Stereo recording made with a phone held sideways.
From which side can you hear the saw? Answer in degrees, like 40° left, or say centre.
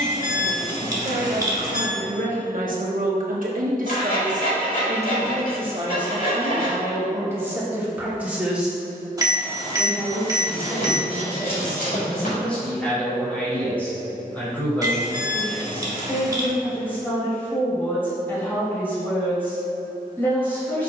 70° left.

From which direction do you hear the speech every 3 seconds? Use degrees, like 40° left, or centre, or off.
60° right, 50° right, 20° right, centre, 10° left, 10° left, 10° left.